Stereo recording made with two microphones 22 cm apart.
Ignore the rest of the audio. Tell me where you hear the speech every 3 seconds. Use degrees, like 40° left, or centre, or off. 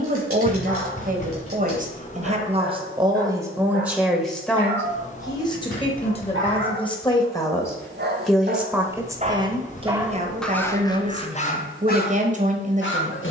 40° right, centre, 10° left, 30° right, 30° right.